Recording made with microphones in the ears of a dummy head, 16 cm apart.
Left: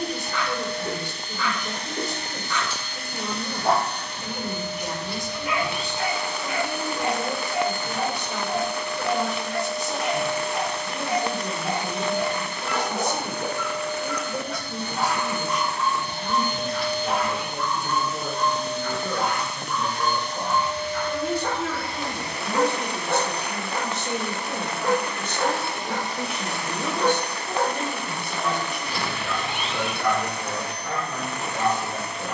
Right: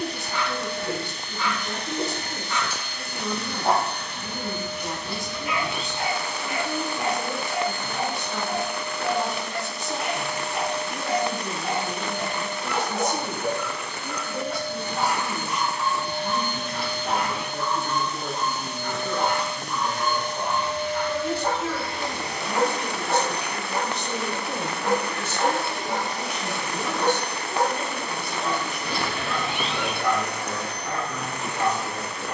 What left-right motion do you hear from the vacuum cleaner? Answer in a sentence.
In this clip you hear the vacuum cleaner go left and come back.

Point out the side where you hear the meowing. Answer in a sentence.
In this clip you hear the meowing on the right.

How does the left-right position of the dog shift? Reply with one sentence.
You can hear the dog stay put.